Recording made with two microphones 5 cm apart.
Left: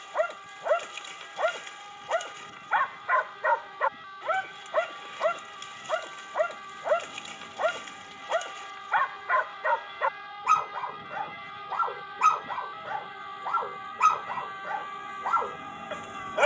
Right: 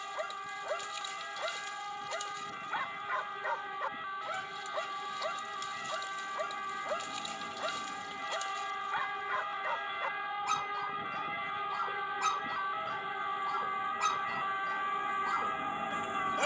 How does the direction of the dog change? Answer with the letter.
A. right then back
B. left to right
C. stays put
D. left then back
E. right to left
C.